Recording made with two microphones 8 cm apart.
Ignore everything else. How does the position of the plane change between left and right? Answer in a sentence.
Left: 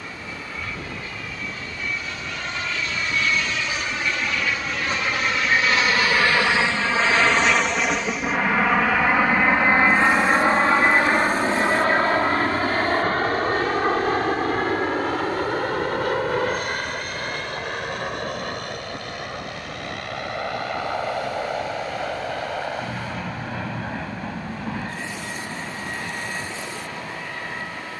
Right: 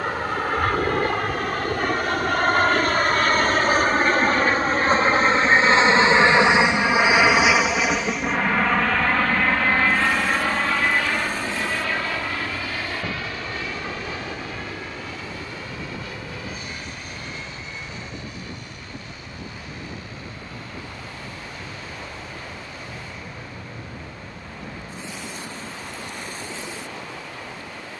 You can hear the plane go from the right side to the left.